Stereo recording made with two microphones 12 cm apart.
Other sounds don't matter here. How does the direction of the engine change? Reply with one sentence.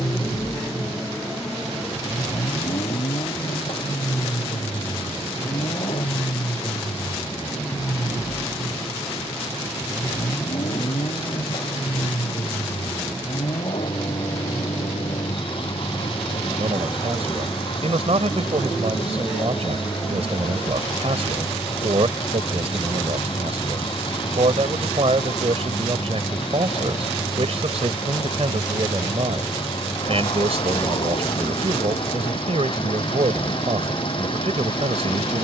In this clip you hear the engine stay in one place.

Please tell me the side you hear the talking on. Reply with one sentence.
You can hear the talking on the right.